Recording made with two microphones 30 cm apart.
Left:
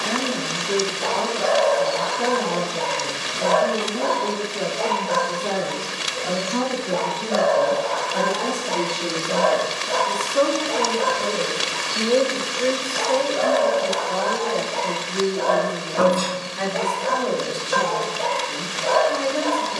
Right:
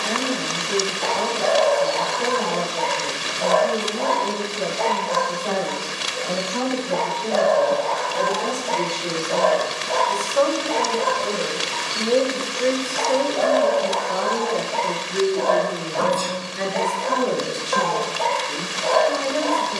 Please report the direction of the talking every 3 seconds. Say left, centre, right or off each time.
left, left, left, left, centre, right, right.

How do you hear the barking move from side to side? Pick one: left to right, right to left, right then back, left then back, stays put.
stays put.